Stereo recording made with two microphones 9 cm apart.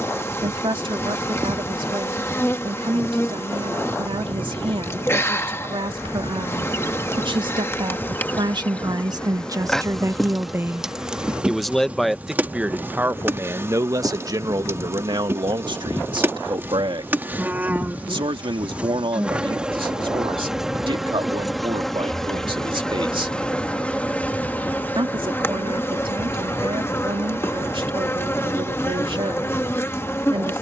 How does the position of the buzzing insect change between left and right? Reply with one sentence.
You can hear the buzzing insect move from left to right and back again.